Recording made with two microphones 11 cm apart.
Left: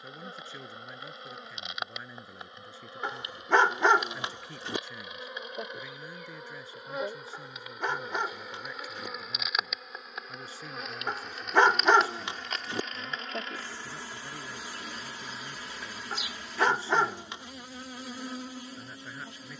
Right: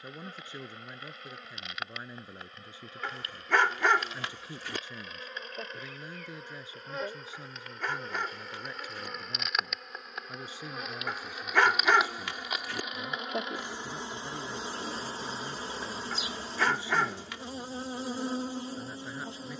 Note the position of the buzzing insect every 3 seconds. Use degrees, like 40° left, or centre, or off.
20° left, 20° left, 10° left, centre, 20° right, 30° right, 30° right.